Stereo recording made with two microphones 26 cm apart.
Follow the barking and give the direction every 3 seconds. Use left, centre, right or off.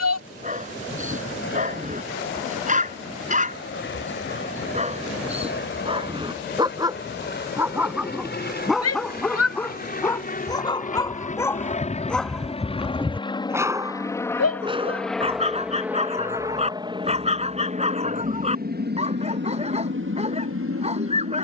right, right, centre, centre, centre, right, right.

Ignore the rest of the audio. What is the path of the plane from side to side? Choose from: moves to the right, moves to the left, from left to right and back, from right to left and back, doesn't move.
moves to the right.